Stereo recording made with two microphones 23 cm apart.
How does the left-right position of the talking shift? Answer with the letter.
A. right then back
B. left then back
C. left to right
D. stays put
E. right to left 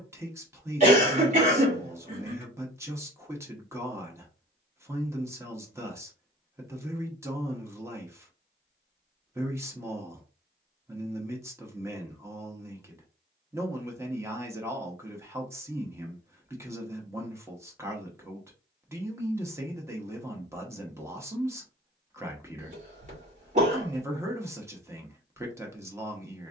D.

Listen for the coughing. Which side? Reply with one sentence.
You can hear the coughing on the right.